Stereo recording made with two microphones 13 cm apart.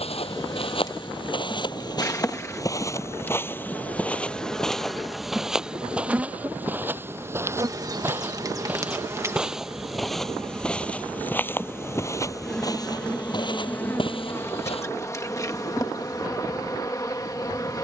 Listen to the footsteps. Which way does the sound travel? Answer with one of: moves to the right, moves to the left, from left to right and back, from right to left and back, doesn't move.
from left to right and back.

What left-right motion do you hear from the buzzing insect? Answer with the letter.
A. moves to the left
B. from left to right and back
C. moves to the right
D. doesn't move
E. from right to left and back
B.